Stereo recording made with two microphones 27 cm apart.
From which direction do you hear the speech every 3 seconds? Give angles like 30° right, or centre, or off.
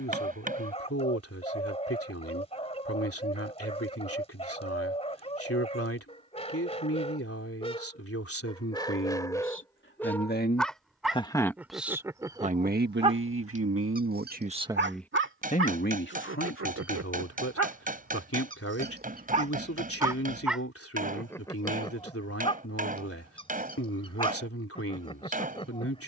60° left, 60° left, 60° left, 30° left, 40° right, 50° left, 60° left, 60° left, 60° left.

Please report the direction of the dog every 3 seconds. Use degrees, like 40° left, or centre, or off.
20° left, 20° left, 20° left, centre, 20° right, 60° right, 30° right, 20° left, 20° left.